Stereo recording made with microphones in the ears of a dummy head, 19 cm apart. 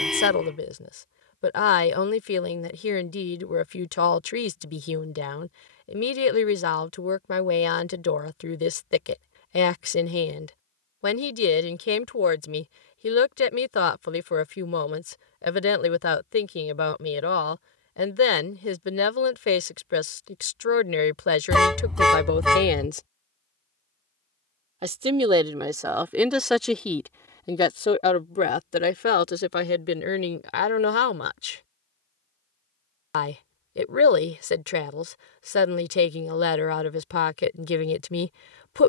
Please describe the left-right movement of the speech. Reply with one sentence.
In this clip you hear the speech move from left to right and back again.